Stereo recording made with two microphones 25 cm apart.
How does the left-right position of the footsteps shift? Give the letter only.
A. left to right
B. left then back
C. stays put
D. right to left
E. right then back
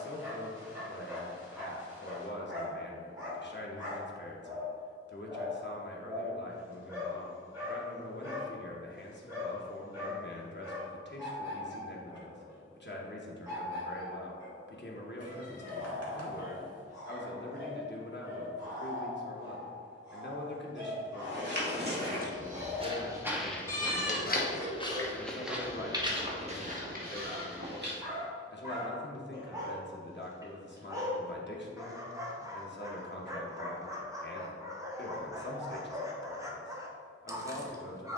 B.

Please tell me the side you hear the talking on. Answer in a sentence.
You can hear the talking on the left.